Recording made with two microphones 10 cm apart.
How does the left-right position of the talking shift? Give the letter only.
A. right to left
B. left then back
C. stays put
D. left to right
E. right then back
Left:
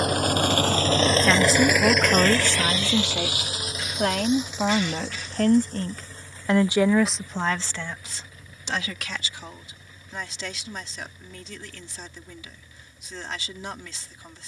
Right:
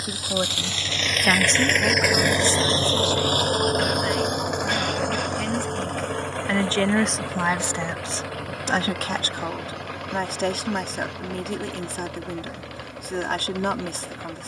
B.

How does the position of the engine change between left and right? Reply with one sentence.
You can hear the engine travel towards the right.